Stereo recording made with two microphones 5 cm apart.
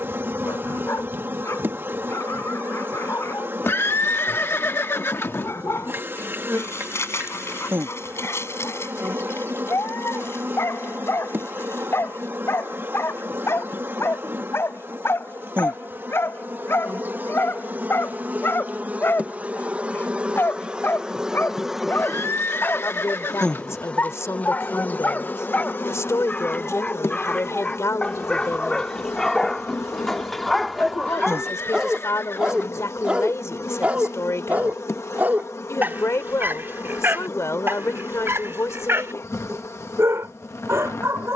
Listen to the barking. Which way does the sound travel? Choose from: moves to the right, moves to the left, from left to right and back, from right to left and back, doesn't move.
moves to the right.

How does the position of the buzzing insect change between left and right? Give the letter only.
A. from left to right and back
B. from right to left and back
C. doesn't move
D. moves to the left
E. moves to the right
D.